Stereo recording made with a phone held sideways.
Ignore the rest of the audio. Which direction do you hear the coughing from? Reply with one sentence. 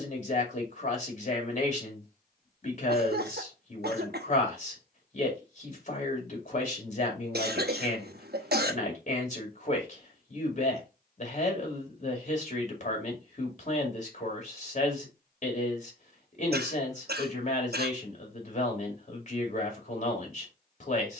You can hear the coughing on the right.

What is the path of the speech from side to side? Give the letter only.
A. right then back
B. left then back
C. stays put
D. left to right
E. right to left
C.